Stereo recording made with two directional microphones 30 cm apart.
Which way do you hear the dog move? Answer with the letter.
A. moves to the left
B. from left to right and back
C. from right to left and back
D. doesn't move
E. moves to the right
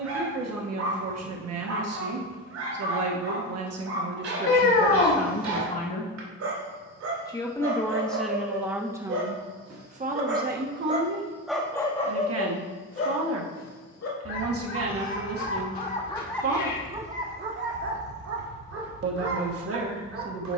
C.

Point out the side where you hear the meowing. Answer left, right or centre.
left.